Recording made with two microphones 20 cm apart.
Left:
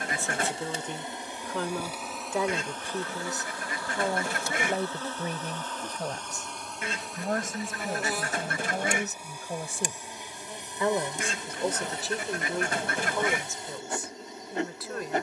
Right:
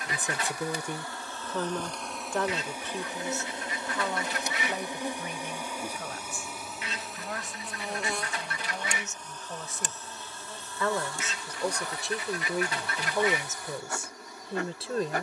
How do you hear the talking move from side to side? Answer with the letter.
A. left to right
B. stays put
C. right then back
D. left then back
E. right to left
D.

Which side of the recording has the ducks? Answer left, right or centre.
left.